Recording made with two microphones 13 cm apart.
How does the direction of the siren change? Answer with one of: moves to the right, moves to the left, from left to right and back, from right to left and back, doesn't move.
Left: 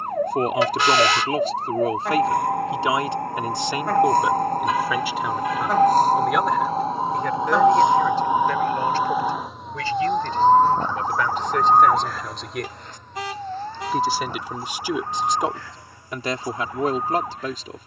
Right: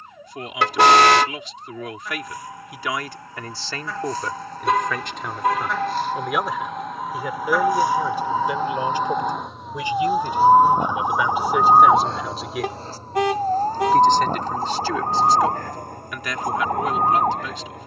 moves to the right.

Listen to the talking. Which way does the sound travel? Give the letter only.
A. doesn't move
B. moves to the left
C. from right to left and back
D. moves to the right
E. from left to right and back
E.